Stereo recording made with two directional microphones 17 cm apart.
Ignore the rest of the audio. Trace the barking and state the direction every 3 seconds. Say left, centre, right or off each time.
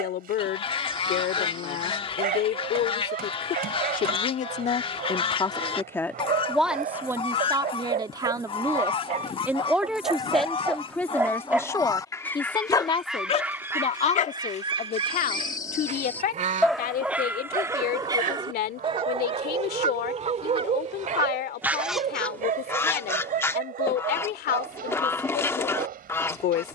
right, right, right, right, left, centre, right, right, right.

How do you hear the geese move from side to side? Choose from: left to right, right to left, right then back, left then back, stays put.
right then back.